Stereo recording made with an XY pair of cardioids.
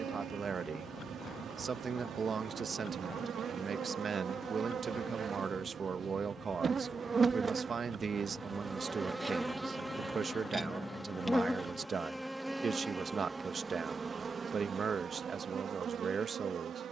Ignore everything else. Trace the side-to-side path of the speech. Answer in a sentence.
In this clip you hear the speech stay put.